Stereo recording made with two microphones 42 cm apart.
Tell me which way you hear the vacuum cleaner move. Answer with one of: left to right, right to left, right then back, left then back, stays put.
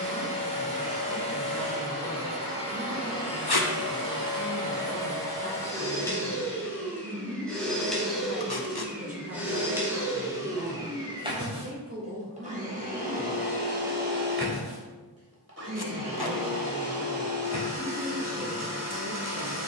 left to right.